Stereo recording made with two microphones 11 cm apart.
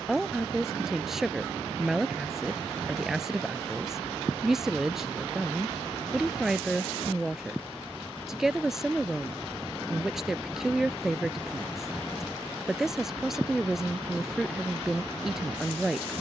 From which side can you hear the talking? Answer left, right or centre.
centre.